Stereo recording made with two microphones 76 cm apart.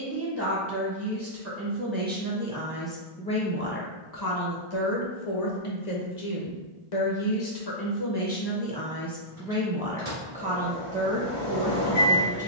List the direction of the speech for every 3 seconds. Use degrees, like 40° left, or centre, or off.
10° right, 30° left, 30° left, 10° right.